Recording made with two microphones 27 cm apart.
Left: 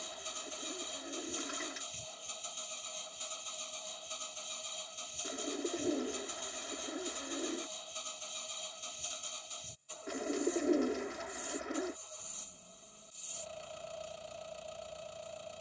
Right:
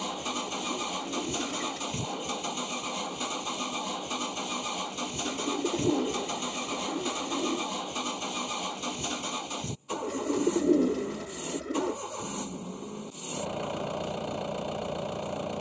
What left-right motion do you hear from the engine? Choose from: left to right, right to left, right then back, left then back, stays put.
stays put.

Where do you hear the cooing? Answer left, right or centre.
right.